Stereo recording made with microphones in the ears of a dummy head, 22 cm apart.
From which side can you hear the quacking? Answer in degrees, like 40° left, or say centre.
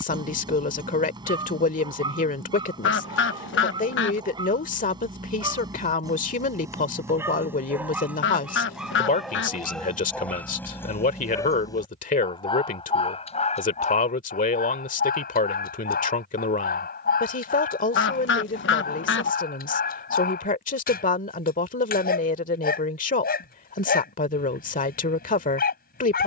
50° left.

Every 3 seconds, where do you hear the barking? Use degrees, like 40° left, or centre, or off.
20° right, 20° right, 10° right, 10° left, 30° left, 40° left, 40° left, 40° left, 40° left.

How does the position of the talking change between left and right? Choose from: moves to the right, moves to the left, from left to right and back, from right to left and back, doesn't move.
doesn't move.